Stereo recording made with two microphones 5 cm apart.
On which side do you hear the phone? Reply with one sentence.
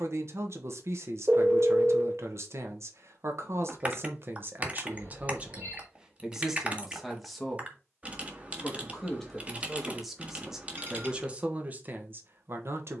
In this clip you hear the phone on the right.